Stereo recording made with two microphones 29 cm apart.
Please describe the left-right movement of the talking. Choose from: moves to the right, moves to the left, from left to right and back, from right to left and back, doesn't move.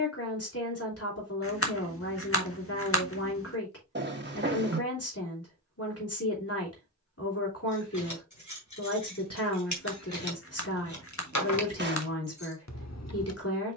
doesn't move.